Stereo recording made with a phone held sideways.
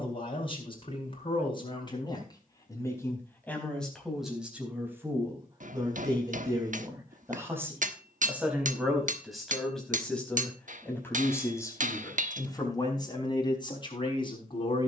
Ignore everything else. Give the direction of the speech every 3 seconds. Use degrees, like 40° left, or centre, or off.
30° left, 10° right, 20° right, 10° left, 30° left.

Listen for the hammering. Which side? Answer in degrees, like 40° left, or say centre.
60° right.